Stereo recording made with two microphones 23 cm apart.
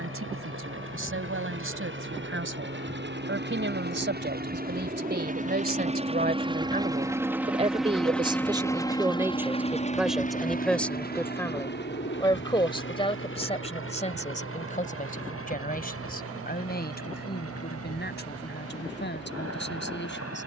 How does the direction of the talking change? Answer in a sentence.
You can hear the talking travel towards the left.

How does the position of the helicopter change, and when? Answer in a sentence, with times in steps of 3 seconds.
You can hear the helicopter on the right from 0 s, in the centre from 6 s and on the left from 9 s.